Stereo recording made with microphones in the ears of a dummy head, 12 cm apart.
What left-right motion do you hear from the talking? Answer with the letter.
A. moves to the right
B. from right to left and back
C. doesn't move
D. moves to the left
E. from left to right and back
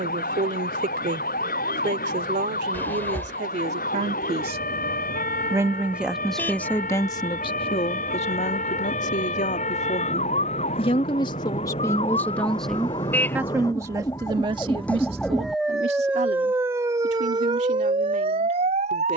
B.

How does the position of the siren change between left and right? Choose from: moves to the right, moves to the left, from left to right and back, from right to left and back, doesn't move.
moves to the right.